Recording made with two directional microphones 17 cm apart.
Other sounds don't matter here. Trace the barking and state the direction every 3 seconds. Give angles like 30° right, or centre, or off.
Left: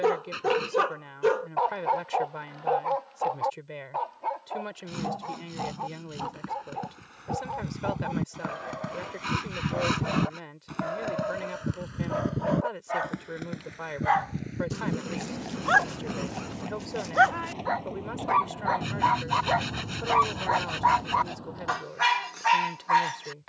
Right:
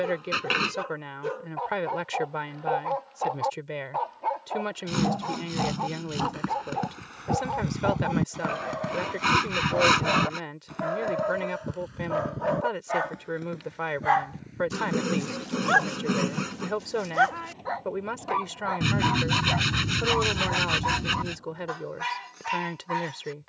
40° left, 20° right, 30° right, 20° right, 10° right, 10° left, 30° left, 40° left.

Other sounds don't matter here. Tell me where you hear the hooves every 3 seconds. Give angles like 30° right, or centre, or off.
off, off, 30° right, 10° left, 40° left, 60° left, 60° left, 60° left.